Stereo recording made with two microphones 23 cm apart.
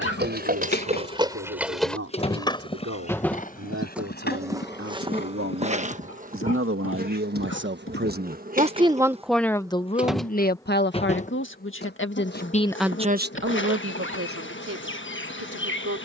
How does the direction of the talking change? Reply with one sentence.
You can hear the talking go left and come back.